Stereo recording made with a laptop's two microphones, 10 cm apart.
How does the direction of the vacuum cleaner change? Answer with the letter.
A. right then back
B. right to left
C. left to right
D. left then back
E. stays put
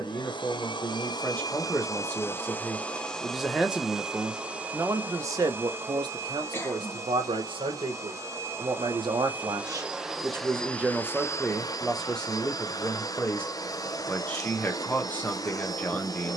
A.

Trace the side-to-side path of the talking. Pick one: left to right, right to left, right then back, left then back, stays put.
right then back.